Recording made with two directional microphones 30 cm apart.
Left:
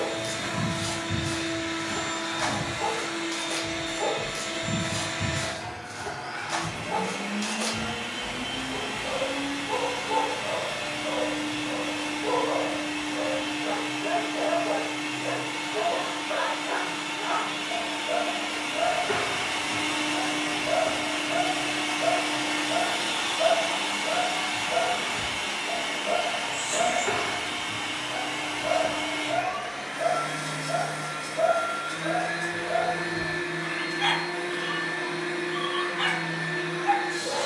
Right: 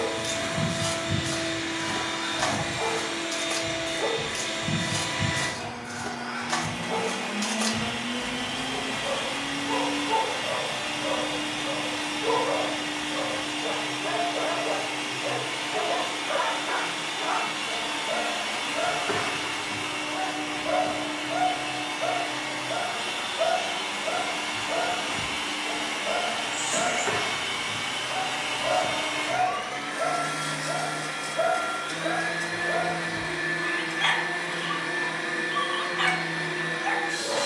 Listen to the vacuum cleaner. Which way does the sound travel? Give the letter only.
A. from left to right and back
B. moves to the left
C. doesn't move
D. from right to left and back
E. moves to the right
D.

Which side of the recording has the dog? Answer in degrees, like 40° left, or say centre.
20° right.